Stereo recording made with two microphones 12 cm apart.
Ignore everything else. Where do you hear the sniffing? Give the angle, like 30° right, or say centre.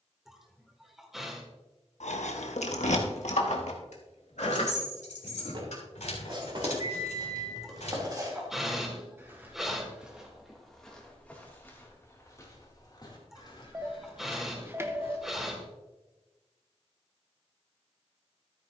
centre.